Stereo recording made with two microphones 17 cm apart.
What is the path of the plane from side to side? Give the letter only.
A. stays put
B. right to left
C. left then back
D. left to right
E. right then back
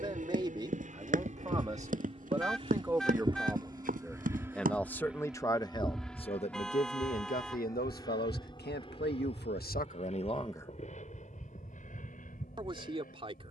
B.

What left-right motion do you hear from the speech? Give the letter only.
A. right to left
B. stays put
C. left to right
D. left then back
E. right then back
D.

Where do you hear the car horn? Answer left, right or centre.
centre.